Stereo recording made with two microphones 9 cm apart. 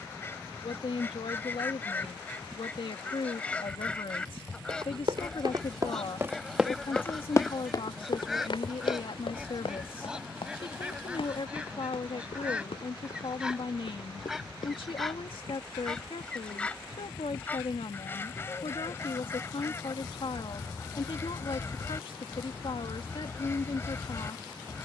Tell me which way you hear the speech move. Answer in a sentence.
In this clip you hear the speech stay put.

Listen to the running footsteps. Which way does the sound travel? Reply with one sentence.
You can hear the running footsteps travel towards the left.